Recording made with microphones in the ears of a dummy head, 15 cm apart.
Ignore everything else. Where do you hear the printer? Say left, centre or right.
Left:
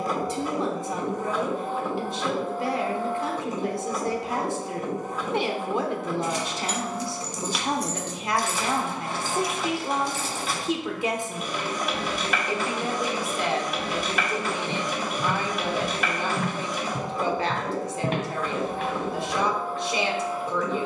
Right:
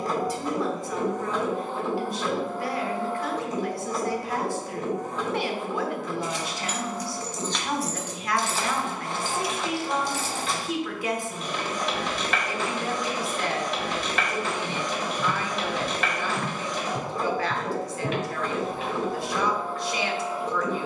centre.